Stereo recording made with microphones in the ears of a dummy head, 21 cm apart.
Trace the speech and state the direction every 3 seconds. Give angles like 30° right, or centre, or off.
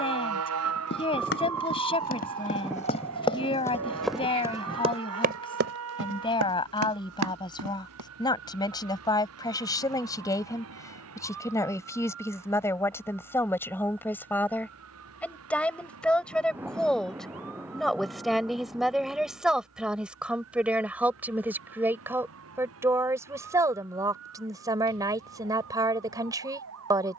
20° left, 20° left, 20° left, 10° left, 10° left, centre, centre, 10° right, 20° right.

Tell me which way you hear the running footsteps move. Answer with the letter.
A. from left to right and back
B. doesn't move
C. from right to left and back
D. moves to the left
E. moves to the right
E.